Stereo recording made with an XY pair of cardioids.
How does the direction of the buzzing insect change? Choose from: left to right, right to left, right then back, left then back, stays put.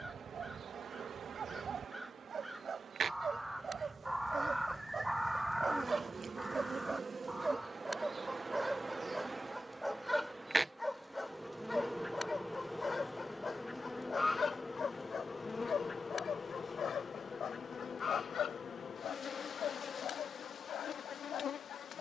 right to left.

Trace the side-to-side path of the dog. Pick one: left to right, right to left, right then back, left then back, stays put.
right to left.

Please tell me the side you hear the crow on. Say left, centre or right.
centre.